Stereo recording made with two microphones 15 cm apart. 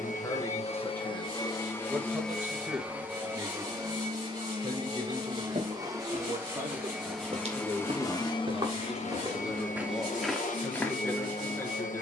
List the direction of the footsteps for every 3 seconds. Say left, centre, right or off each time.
off, right, right, centre.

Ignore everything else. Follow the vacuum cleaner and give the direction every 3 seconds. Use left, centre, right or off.
left, right, centre, left.